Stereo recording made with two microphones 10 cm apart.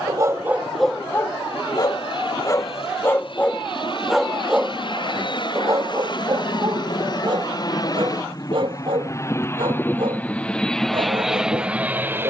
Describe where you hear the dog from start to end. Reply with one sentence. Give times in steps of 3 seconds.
In this clip you hear the dog in the centre from 0 s and on the right from 6 s.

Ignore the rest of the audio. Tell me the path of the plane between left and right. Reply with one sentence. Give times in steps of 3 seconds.
In this clip you hear the plane on the left from 0 s and in the centre from 9 s.